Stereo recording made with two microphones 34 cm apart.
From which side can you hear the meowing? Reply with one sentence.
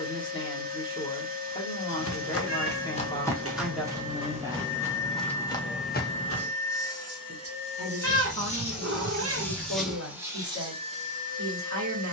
In this clip you hear the meowing on the right.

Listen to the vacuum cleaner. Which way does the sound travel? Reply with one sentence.
You can hear the vacuum cleaner move from right to left and back again.